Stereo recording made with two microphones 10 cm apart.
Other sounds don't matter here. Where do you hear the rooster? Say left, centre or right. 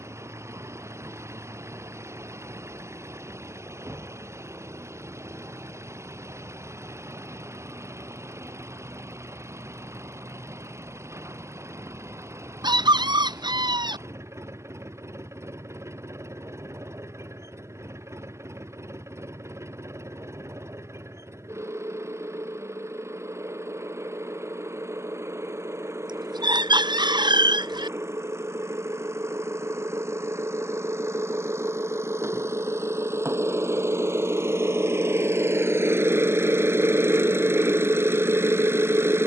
right.